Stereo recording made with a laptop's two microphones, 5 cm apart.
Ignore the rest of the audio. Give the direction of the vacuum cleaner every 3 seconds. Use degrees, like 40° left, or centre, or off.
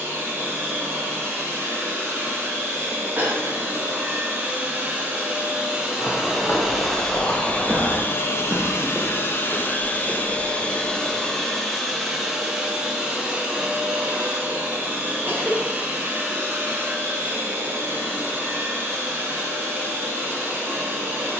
40° right, 30° right, 20° left, 20° left, 20° right, 30° right, 40° right.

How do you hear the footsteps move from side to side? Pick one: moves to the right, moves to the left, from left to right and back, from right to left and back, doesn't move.
moves to the right.